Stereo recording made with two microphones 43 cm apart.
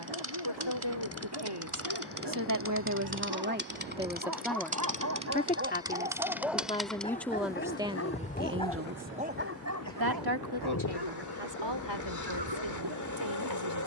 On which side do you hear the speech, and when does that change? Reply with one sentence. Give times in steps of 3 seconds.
In this clip you hear the speech on the right from 0 s, in the centre from 3 s and on the right from 9 s.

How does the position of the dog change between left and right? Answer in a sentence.
In this clip you hear the dog move from right to left and back again.